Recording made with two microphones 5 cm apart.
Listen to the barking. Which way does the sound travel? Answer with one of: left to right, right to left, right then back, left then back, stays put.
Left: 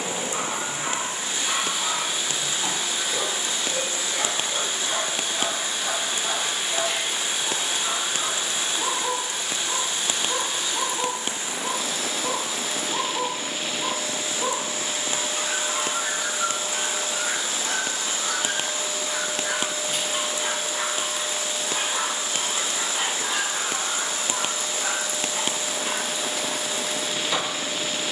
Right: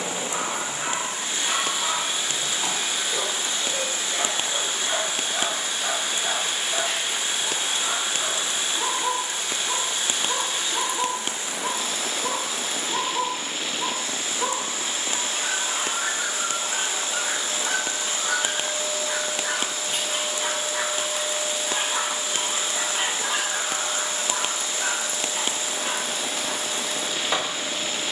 stays put.